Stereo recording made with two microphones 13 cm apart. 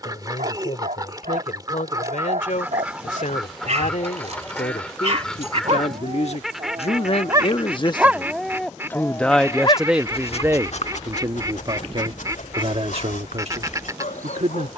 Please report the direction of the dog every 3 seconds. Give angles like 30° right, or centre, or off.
70° right, 60° right, 20° right, 50° left, 80° left.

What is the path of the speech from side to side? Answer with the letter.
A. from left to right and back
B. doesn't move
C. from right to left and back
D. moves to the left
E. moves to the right
E.